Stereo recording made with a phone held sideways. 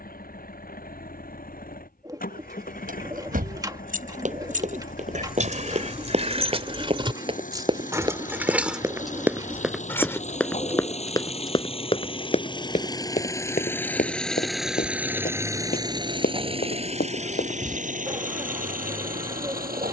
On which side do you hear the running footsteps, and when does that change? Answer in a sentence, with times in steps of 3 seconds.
In this clip you hear the running footsteps not at all from 0 s, on the right from 3 s, in the centre from 9 s, on the left from 12 s and not at all from 18 s.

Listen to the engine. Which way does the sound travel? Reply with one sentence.
You can hear the engine travel towards the right.